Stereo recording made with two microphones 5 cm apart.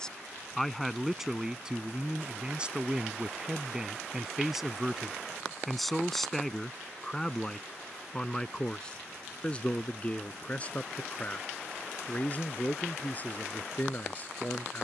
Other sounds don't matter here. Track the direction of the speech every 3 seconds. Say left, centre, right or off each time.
centre, centre, centre, left, left.